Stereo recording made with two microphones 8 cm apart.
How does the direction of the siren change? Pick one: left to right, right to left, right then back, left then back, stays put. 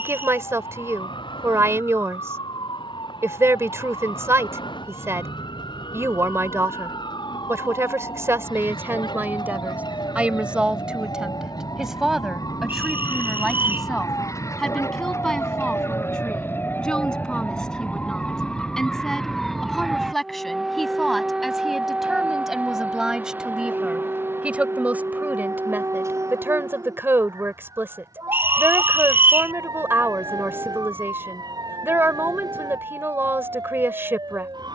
left to right.